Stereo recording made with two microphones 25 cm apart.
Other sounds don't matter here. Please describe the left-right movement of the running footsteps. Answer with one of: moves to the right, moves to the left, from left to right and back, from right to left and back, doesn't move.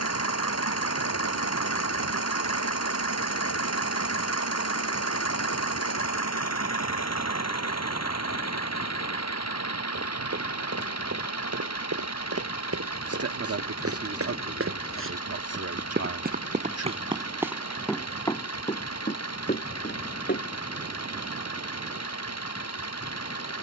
moves to the left.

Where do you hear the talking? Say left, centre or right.
right.